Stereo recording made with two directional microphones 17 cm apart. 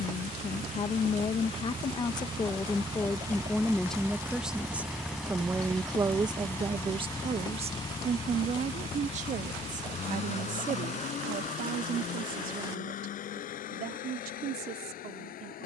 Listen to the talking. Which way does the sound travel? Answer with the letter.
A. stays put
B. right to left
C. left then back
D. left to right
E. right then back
D.